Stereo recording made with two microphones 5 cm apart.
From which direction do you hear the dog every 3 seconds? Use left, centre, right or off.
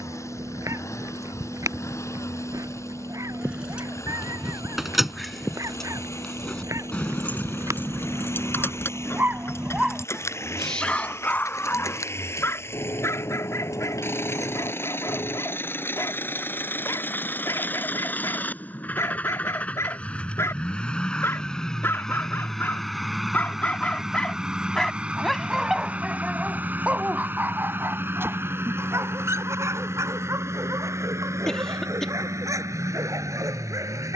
right, right, right, centre, left, left, left, left, centre, right, right, right.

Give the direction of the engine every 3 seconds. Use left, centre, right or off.
left, left, left, left, left, left, left, centre, right, right, right, right.